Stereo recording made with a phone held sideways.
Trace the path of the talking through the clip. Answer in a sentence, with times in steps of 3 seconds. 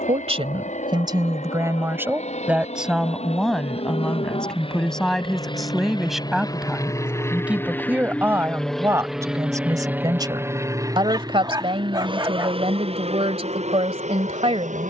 In this clip you hear the talking on the right from 0 s, in the centre from 3 s and on the right from 9 s.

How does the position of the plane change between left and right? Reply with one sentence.
In this clip you hear the plane move to the right.